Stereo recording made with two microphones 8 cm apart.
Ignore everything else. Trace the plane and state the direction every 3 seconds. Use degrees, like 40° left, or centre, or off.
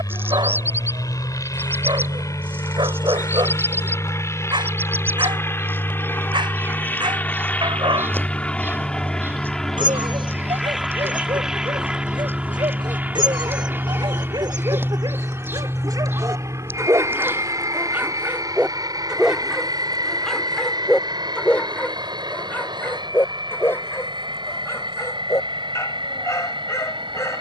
50° left, 30° left, 20° left, centre, 20° right, 40° right, 50° right, 60° right, 60° right.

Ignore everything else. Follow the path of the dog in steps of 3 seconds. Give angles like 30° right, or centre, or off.
80° right, 80° right, 80° right, 80° right, 70° right, 40° right, centre, 20° left, 30° left.